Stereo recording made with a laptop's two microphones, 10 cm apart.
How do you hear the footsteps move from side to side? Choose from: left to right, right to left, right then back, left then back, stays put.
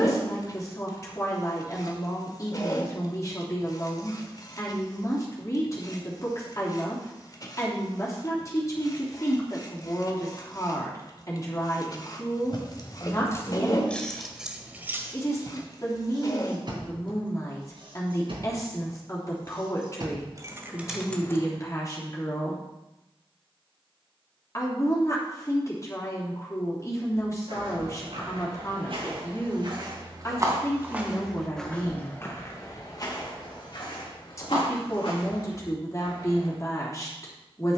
right to left.